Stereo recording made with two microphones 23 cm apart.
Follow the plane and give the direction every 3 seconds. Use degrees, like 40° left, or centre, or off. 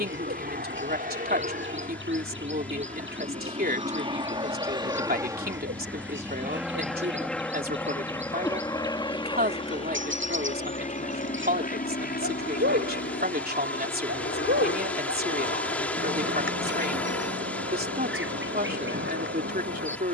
40° right, 20° right, centre, 30° left, 50° left, 60° left, 60° left.